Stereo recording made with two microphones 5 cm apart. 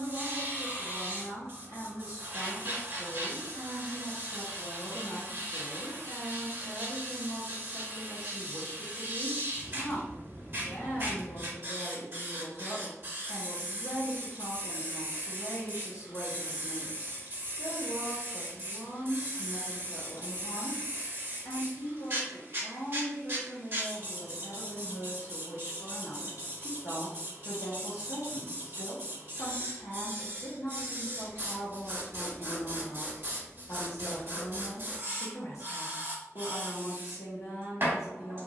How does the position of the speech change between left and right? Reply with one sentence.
In this clip you hear the speech stay in one place.